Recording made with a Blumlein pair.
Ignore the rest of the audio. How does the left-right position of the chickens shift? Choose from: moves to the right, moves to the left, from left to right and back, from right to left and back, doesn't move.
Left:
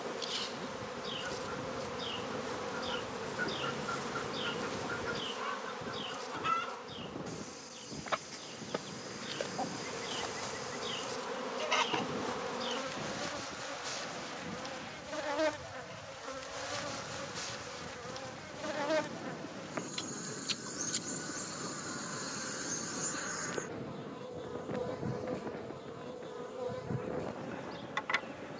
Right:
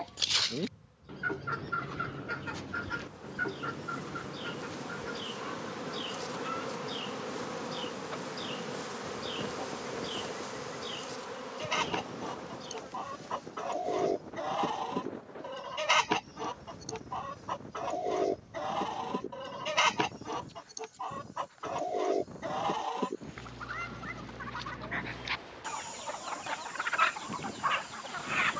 from right to left and back.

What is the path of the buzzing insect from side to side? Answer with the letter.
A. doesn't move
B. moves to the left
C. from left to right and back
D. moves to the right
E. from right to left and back
C.